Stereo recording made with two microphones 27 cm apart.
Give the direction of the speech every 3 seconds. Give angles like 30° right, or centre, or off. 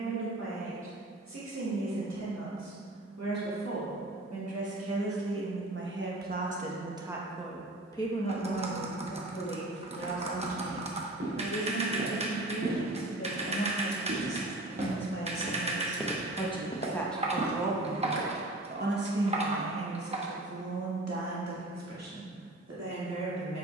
80° right, 60° right, centre, 50° left, 50° left, 20° left, 50° right, 70° right.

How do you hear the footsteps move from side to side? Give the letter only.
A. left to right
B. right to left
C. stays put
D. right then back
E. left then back
B.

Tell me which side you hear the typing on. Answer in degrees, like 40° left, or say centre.
20° right.